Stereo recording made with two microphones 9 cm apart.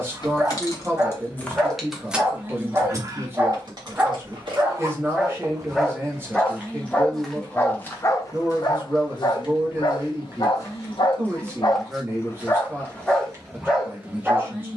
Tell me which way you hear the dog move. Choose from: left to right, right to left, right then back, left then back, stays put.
left then back.